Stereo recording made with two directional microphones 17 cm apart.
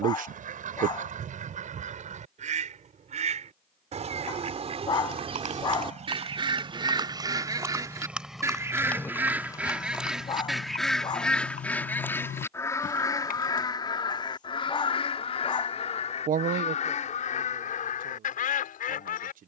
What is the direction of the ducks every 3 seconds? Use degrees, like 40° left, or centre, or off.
50° right, 40° right, 20° right, centre, 20° left, 40° left, 50° left.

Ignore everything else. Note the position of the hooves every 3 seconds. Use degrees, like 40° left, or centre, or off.
off, 50° right, 20° right, 30° left, 50° left, off, off.